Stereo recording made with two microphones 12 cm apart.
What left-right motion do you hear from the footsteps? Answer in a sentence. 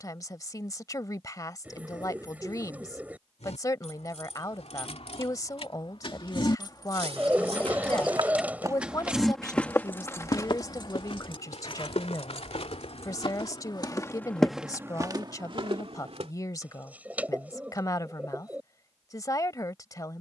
You can hear the footsteps go left and come back.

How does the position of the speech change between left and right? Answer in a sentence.
You can hear the speech stay in one place.